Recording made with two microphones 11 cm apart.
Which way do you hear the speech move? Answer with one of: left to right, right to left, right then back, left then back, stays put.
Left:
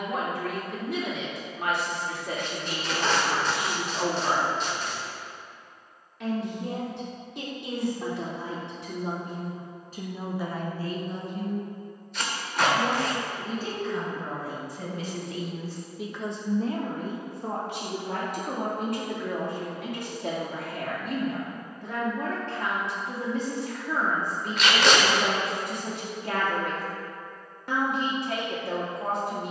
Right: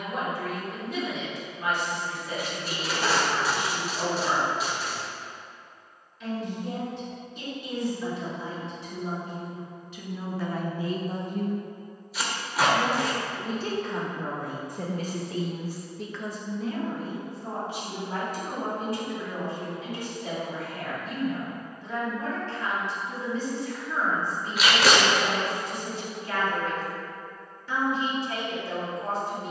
right then back.